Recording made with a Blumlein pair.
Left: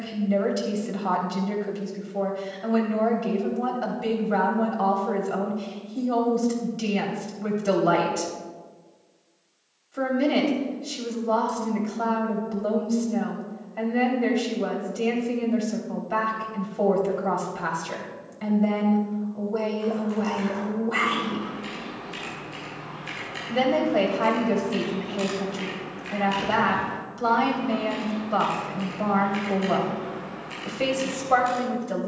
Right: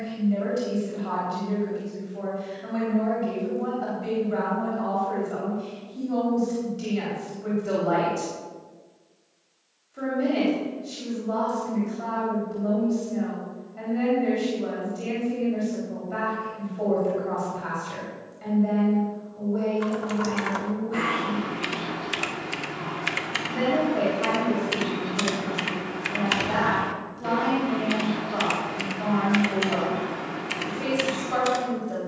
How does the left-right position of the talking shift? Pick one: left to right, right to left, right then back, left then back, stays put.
stays put.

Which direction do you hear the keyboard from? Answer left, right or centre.
right.